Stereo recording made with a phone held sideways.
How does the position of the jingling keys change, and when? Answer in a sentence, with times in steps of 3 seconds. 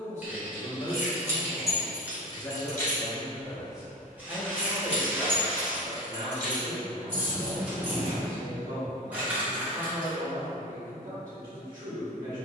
In this clip you hear the jingling keys in the centre from 0 s, on the right from 6 s and not at all from 9 s.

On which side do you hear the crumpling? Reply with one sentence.
You can hear the crumpling in the centre.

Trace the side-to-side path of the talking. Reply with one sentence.
In this clip you hear the talking go from the left side to the right.